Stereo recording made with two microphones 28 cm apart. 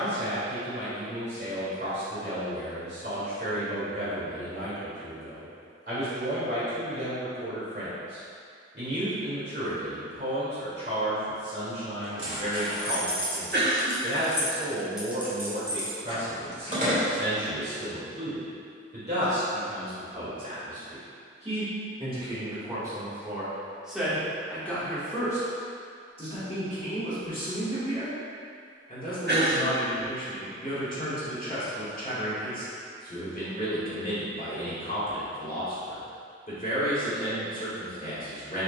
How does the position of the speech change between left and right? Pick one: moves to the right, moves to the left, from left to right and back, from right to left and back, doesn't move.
moves to the left.